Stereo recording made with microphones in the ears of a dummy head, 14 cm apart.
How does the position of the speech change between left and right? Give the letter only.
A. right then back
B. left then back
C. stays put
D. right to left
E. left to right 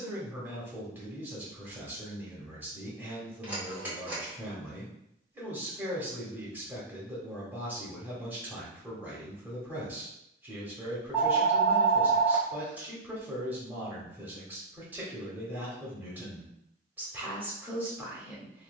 C.